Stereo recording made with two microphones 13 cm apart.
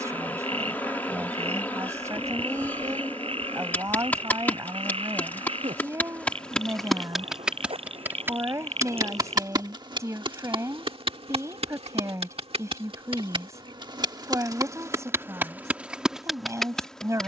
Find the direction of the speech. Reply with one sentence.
In this clip you hear the speech on the right.